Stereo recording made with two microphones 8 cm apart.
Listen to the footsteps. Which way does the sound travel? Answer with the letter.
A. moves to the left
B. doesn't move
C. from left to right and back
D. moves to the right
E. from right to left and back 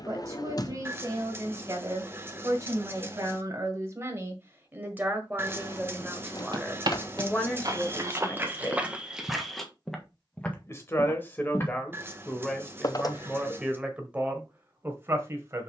A.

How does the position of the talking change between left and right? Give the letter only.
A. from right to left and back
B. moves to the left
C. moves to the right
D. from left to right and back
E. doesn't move
A.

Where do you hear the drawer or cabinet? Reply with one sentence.
You can hear the drawer or cabinet on the left.